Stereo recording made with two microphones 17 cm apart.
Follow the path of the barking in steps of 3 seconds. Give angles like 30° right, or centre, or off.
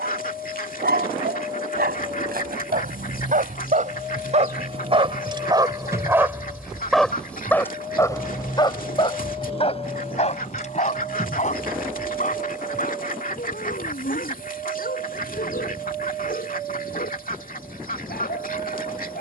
70° right, 40° right, 10° left, 40° left, 60° left, 60° left, 70° left.